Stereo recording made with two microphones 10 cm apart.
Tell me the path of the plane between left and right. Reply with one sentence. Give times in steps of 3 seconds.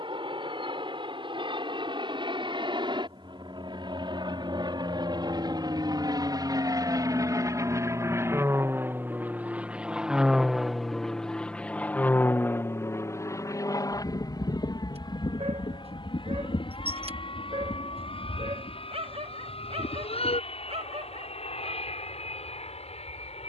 You can hear the plane on the right from 0 s, in the centre from 9 s and on the left from 12 s.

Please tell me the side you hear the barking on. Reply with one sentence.
You can hear the barking on the right.